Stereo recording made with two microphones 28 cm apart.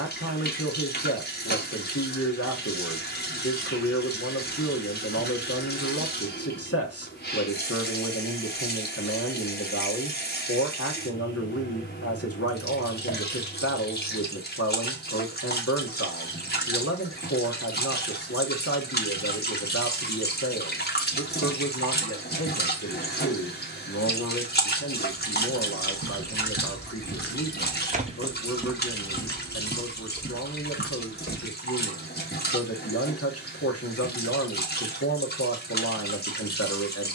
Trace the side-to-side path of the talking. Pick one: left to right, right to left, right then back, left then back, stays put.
stays put.